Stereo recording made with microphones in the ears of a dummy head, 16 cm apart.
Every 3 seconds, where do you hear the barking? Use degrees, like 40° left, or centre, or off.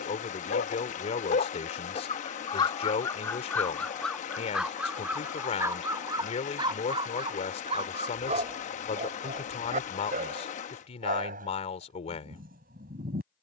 40° left, centre, 30° right, 50° right, 50° right.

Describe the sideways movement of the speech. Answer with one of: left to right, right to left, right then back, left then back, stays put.
stays put.